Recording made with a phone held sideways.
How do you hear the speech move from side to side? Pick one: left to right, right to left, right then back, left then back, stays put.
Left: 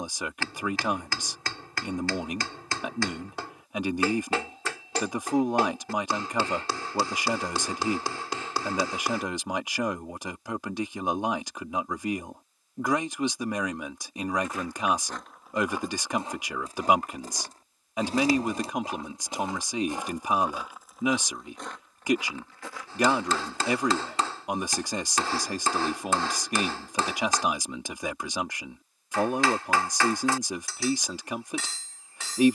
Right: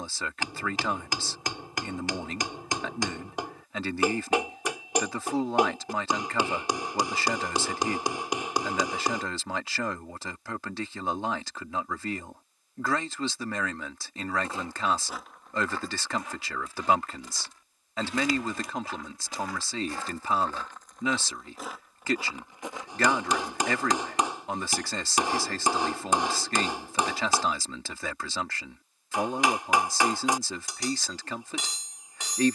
stays put.